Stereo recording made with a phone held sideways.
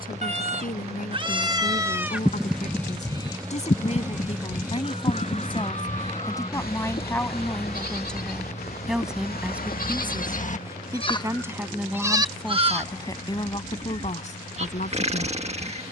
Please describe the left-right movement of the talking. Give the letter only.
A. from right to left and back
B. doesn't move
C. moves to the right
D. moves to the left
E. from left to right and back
E.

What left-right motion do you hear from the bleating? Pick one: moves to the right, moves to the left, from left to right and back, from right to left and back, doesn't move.
from right to left and back.